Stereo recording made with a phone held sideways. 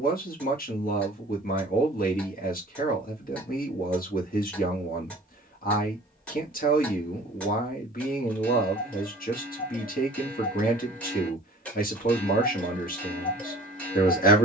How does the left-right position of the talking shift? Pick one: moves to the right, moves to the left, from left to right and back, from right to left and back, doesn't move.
doesn't move.